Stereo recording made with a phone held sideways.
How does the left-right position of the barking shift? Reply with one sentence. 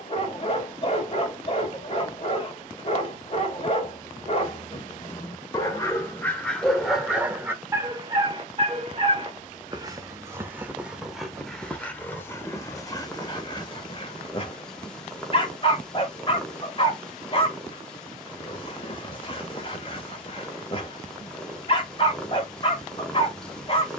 In this clip you hear the barking go right and come back.